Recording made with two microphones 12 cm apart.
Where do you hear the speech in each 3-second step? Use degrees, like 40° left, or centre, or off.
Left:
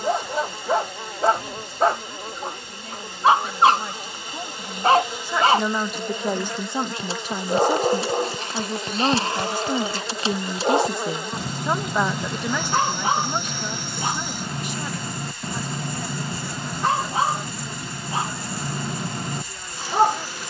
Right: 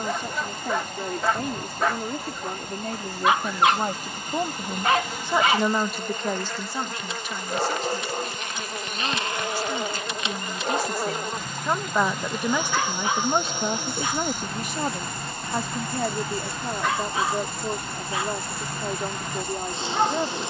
60° right, 30° right, 40° left, 30° left, 30° right, 60° right, 60° right.